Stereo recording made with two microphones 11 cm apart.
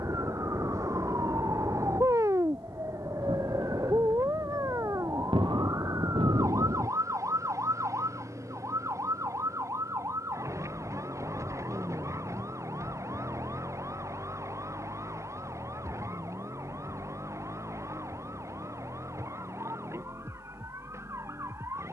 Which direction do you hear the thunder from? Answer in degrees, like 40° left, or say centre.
50° right.